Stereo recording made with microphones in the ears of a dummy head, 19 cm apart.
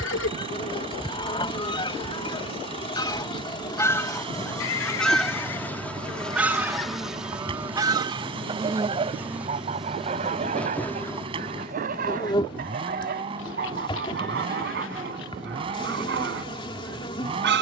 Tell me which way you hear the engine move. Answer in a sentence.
In this clip you hear the engine stay put.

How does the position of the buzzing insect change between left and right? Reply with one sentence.
In this clip you hear the buzzing insect go right and come back.